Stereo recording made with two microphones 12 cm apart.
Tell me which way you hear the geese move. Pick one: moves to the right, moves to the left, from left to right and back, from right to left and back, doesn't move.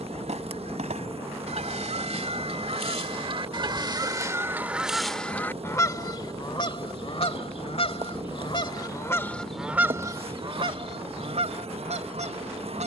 from right to left and back.